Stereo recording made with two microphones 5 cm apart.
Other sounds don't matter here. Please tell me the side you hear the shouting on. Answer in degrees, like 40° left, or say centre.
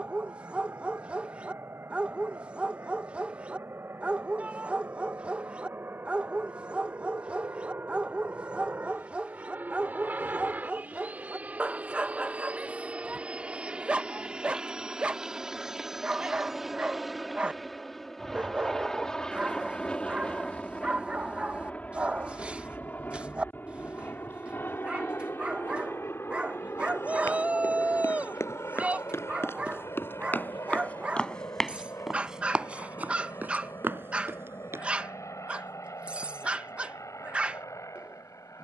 30° right.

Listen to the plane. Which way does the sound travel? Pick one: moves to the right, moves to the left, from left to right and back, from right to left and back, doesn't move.
moves to the left.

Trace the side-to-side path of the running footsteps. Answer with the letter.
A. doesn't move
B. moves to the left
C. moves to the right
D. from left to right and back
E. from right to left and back
C.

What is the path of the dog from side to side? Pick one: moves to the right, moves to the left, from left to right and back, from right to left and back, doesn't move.
doesn't move.